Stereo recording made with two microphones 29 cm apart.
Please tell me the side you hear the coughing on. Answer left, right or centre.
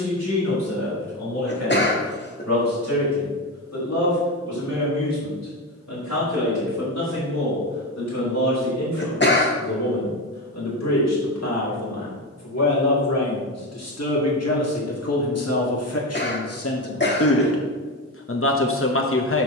left.